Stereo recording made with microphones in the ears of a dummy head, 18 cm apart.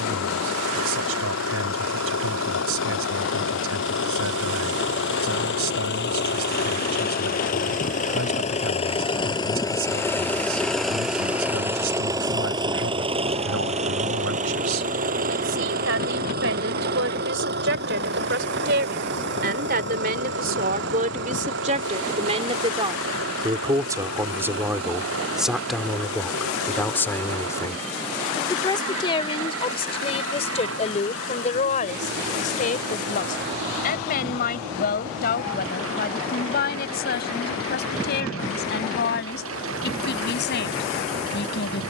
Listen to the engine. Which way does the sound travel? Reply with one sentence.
You can hear the engine move to the right.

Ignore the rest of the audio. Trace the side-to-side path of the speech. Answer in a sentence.
In this clip you hear the speech move to the left.